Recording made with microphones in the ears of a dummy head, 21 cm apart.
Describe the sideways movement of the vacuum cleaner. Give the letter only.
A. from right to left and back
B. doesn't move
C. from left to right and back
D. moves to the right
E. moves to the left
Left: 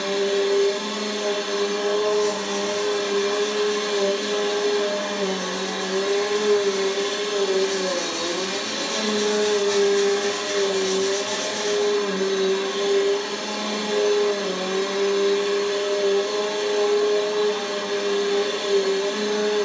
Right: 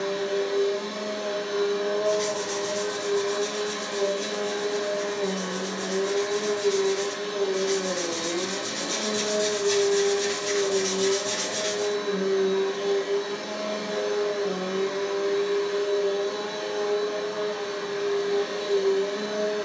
B.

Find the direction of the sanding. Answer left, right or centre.
right.